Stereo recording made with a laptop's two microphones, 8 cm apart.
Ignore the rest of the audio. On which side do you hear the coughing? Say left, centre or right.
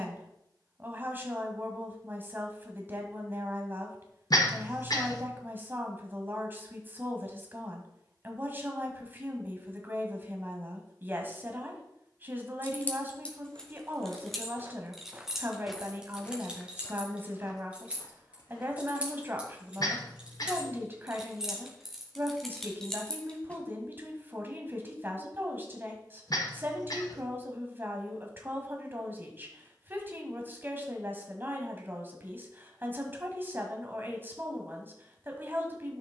left.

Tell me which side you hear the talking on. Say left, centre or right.
right.